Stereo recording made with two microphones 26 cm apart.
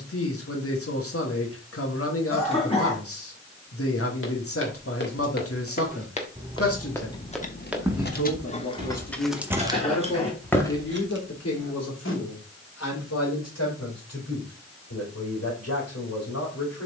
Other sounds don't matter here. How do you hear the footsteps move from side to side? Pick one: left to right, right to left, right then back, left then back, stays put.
right then back.